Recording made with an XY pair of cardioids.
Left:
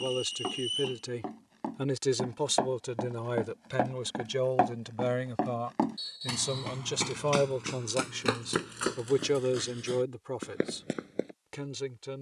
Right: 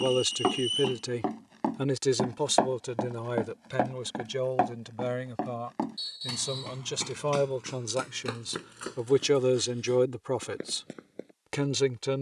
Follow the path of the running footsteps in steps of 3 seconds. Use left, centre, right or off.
right, centre, left, left.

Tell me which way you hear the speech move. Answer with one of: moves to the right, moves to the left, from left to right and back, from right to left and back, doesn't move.
from right to left and back.